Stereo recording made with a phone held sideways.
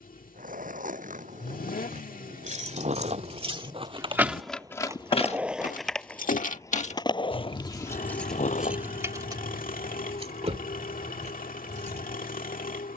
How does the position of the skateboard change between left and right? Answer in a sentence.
You can hear the skateboard travel towards the left.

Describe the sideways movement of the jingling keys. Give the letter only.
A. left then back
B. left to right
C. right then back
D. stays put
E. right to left
A.